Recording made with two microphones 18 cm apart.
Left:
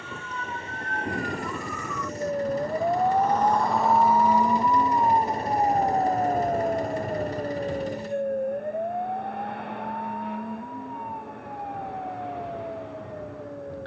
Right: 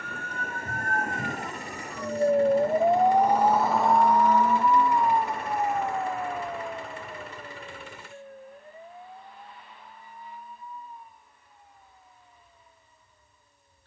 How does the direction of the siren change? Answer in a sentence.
You can hear the siren move from right to left.